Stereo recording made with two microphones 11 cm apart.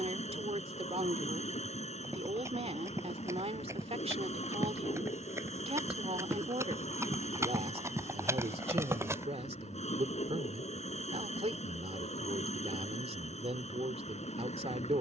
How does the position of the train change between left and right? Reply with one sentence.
You can hear the train stay in one place.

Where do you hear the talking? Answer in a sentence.
You can hear the talking on the right.